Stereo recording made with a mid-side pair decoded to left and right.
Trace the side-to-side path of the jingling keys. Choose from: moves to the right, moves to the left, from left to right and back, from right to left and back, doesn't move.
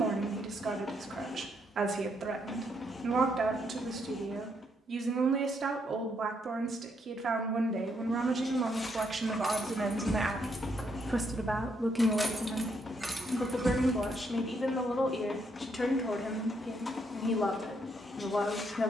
moves to the right.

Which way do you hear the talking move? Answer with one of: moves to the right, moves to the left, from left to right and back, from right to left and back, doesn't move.
moves to the left.